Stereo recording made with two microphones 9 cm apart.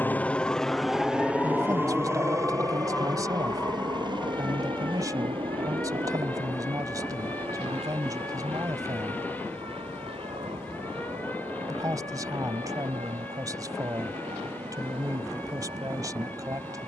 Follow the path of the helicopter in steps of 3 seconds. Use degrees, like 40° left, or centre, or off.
10° right, 50° right, 60° right, 70° right, 70° right, 70° right.